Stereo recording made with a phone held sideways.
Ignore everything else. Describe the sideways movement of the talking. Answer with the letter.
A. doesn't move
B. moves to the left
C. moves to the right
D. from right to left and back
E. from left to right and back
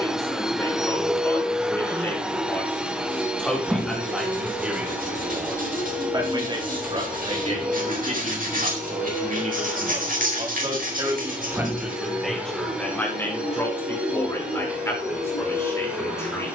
E.